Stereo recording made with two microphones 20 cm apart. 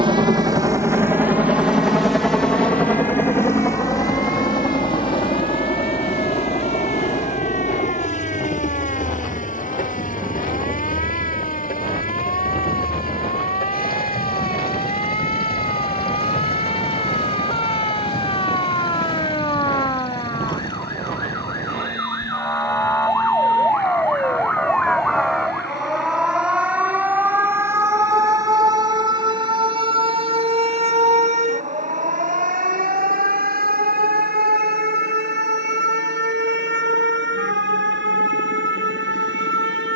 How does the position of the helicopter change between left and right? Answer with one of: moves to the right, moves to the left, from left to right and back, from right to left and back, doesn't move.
moves to the left.